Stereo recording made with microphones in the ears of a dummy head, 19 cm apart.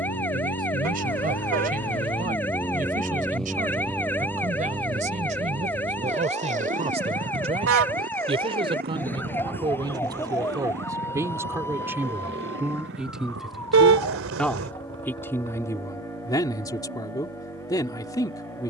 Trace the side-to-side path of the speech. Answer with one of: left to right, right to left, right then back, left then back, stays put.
right to left.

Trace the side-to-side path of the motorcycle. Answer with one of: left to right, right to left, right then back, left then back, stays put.
left to right.